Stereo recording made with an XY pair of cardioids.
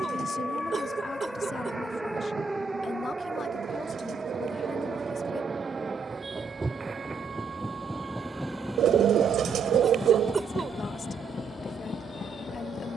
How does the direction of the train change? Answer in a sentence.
In this clip you hear the train move from right to left.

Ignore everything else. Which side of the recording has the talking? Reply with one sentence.
You can hear the talking on the left.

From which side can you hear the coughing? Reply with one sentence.
You can hear the coughing on the right.